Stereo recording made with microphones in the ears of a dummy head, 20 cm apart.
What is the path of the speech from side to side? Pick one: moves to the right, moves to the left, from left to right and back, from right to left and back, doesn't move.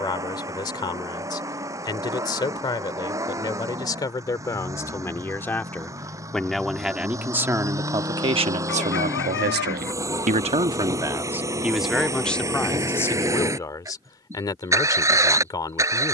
from left to right and back.